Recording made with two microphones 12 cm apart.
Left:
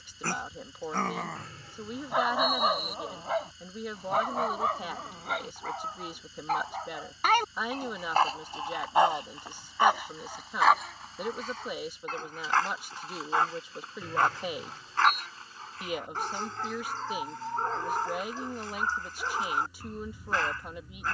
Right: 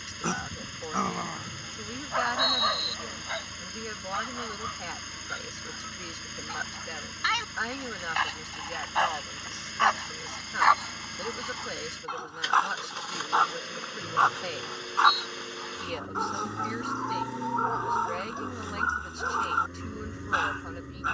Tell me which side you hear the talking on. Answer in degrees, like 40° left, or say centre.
10° left.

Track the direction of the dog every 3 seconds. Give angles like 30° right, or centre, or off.
10° left, 50° left, 40° left, 10° left, 10° right, 20° right, 20° right.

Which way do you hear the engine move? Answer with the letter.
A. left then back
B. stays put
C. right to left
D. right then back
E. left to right
B.